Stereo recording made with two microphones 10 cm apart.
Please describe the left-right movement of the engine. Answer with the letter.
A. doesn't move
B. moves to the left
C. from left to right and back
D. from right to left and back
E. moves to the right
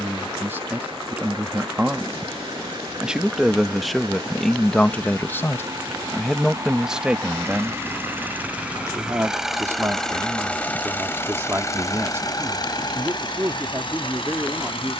B.